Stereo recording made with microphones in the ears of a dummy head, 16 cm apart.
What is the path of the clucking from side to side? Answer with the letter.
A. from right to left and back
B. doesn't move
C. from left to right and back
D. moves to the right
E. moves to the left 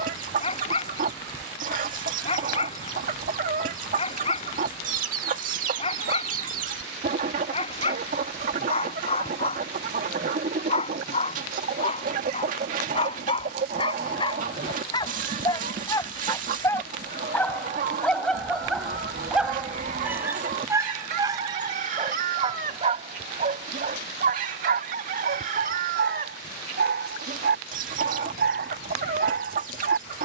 B.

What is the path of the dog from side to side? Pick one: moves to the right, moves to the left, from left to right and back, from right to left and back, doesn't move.
moves to the right.